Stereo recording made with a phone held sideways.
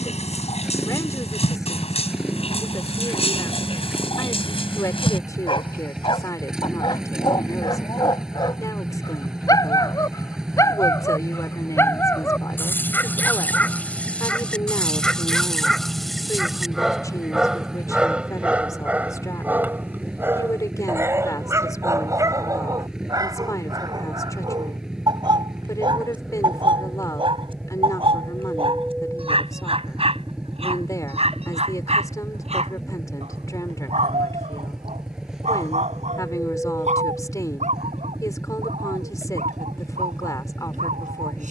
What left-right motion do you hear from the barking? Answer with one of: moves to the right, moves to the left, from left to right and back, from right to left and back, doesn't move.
moves to the right.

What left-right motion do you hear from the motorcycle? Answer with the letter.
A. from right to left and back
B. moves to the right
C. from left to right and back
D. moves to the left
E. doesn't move
E.